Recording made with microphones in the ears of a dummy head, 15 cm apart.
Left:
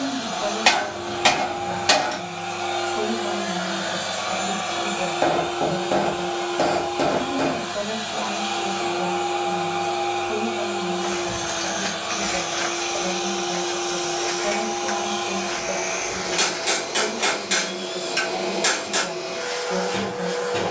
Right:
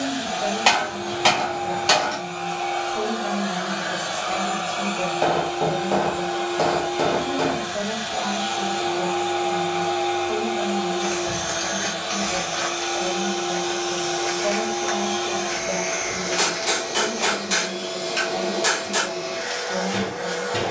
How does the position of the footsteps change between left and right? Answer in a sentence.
You can hear the footsteps move from right to left and back again.